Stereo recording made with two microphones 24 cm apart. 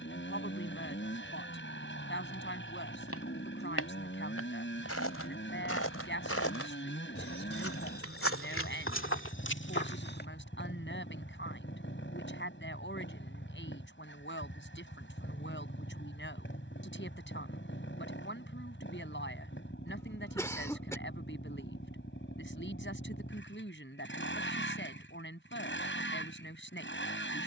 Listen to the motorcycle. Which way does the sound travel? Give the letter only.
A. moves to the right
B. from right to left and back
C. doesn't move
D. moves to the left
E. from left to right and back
C.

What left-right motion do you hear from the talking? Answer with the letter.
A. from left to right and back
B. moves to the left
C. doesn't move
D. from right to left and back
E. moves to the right
C.